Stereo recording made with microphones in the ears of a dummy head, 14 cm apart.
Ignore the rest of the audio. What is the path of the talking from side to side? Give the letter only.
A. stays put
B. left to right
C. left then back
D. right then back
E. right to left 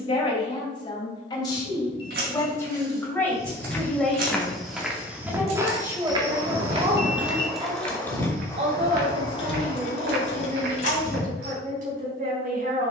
B.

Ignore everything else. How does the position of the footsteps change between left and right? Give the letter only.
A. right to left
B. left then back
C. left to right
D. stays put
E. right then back
C.